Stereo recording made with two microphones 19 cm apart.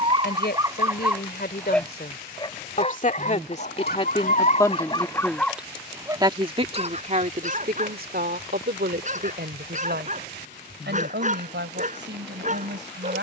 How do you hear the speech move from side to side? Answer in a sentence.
In this clip you hear the speech go from the left side to the right.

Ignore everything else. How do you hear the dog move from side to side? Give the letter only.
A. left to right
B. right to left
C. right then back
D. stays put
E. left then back
E.